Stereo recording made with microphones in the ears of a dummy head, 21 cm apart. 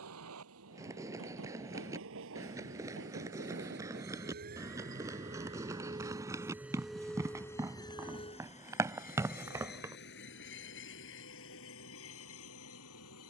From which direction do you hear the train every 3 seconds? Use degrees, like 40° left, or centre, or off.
60° right, 40° right, 10° left, 50° left, 60° left.